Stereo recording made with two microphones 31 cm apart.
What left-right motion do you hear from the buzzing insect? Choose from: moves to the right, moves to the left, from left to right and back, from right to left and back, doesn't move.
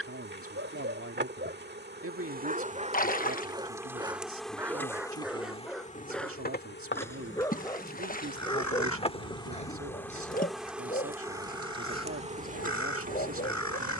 from right to left and back.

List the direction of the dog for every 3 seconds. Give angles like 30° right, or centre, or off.
30° right, 10° right, 10° left, 20° left, 30° left.